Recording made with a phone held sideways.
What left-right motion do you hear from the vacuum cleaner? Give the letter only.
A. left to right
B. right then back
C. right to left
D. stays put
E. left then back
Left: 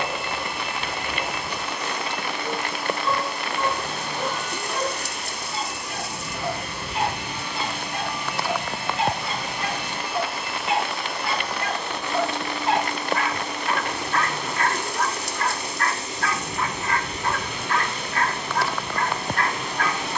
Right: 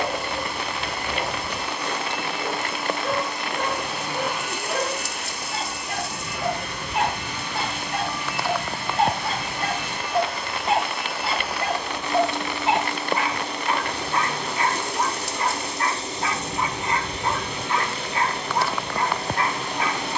E.